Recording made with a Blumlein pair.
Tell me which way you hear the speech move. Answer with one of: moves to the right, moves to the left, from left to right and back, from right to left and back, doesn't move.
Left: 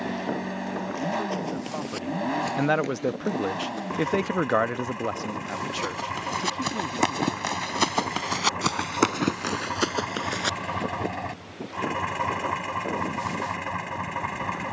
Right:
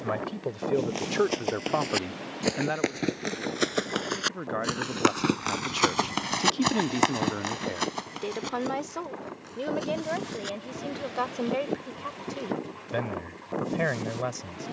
from right to left and back.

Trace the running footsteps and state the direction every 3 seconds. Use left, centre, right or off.
right, right, centre, left, off.